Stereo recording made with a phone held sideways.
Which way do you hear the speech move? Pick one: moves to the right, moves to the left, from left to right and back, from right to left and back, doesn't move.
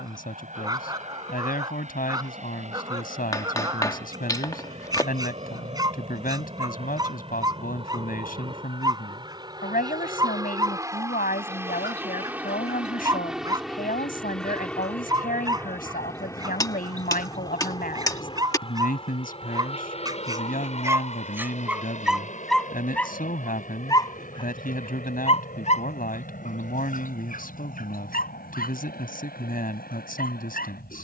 doesn't move.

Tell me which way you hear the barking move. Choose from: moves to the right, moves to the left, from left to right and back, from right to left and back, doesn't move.
moves to the left.